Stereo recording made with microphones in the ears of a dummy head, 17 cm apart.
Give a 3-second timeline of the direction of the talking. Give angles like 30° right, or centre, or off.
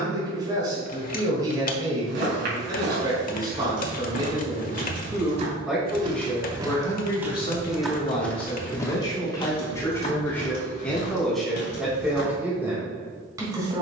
20° right, 20° right, 20° left, 10° left, 10° right.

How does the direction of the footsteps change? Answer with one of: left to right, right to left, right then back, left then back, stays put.
right to left.